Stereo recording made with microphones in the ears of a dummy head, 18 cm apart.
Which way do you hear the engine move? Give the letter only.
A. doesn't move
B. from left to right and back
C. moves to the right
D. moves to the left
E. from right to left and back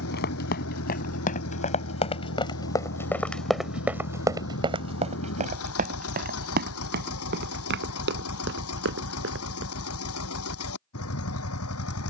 A.